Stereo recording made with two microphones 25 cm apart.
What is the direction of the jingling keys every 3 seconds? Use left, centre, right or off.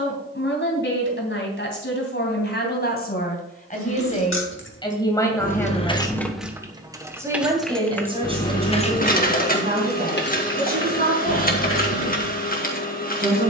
off, left, centre, left, left.